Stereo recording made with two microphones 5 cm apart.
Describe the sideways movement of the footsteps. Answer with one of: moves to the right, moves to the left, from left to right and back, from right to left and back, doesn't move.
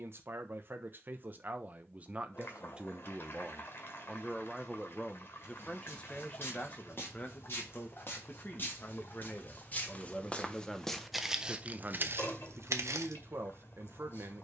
moves to the right.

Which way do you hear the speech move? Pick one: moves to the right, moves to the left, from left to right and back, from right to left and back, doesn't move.
from right to left and back.